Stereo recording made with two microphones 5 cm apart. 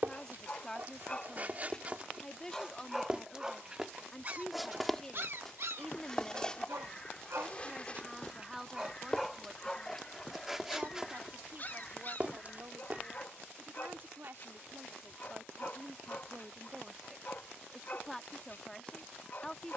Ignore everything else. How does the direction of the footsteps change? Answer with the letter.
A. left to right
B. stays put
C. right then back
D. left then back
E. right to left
D.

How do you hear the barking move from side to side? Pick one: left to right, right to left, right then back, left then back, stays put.
right then back.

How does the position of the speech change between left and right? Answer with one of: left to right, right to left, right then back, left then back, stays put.
right then back.